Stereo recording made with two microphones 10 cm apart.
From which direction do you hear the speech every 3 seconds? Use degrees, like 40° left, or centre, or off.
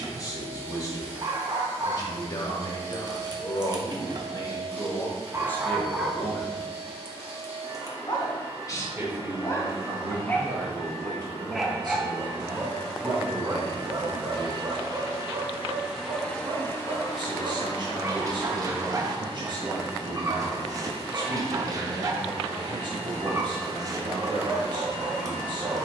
40° left, 30° left, 10° left, 30° right, 50° right, 50° right, 50° right, 50° right, 50° right.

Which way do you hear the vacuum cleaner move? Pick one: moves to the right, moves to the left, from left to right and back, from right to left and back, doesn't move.
from right to left and back.